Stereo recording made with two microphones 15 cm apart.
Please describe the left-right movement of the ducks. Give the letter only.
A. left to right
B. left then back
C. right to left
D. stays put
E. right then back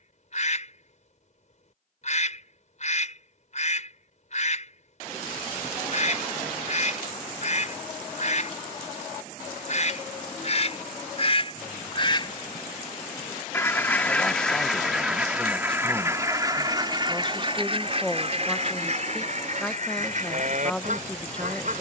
A.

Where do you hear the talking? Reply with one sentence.
You can hear the talking in the centre.